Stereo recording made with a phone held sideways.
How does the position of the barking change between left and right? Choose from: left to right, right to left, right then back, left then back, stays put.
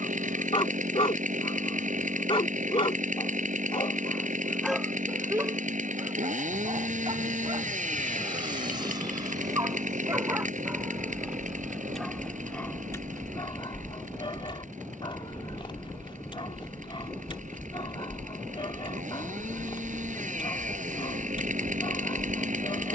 right then back.